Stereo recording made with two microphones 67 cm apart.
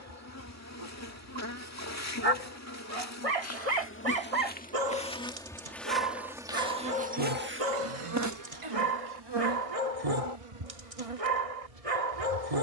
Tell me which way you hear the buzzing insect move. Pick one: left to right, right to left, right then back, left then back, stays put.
left to right.